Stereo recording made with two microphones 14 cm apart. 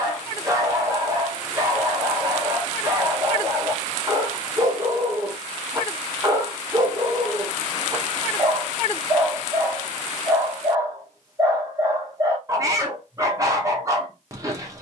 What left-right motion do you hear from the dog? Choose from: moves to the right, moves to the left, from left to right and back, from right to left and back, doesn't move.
doesn't move.